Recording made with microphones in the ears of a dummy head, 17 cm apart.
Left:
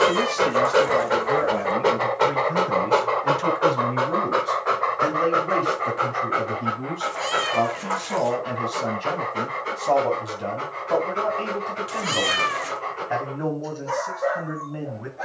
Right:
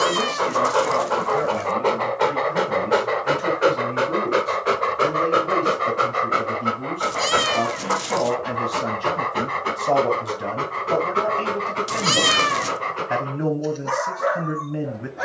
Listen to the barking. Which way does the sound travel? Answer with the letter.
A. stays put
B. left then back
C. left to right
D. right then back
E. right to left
C.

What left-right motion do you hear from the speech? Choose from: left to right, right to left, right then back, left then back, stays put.
left to right.